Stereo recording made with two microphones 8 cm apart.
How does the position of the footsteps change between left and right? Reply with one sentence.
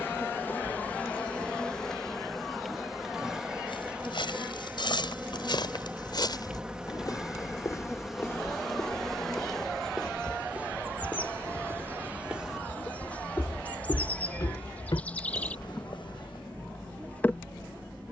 You can hear the footsteps go right and come back.